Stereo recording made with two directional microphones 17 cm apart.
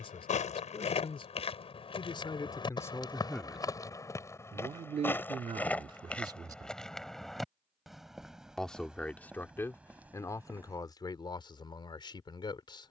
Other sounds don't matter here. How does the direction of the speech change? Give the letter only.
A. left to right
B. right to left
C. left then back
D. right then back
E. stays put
D.